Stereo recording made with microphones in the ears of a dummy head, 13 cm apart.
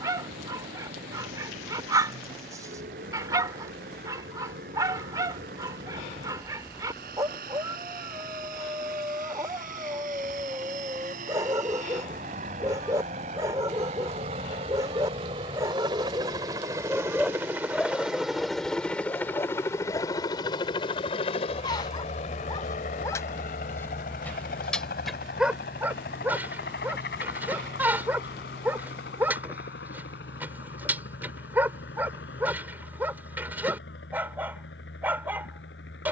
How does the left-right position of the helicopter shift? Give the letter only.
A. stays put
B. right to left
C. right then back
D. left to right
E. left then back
B.